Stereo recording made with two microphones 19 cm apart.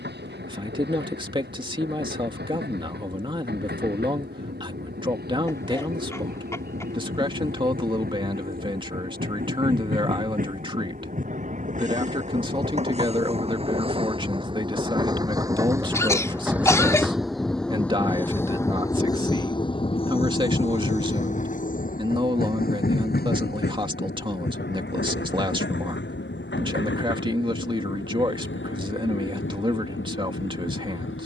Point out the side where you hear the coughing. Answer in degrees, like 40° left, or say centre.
10° left.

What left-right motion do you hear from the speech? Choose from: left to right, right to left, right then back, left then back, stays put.
stays put.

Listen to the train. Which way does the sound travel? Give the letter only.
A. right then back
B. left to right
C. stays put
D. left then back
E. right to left
E.